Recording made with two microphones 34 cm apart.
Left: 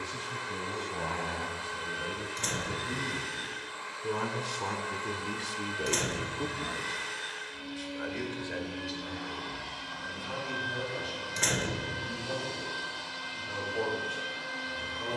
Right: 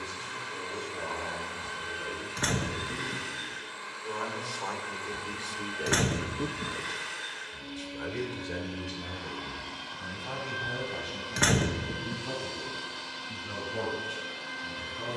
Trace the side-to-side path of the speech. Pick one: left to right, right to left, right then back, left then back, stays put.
left to right.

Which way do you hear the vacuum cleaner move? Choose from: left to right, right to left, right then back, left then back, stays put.
stays put.